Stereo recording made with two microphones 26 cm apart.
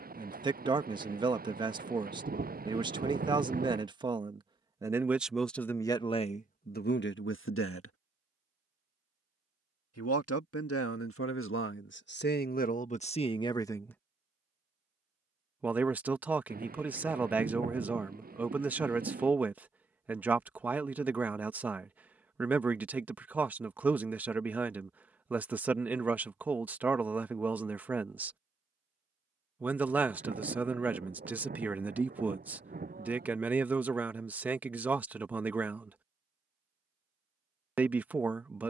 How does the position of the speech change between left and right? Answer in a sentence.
You can hear the speech go left and come back.